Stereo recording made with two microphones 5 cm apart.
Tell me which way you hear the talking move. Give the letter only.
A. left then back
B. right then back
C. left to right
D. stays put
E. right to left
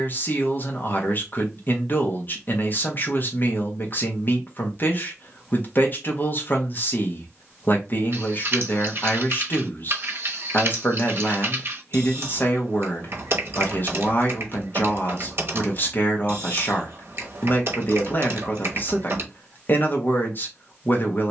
D.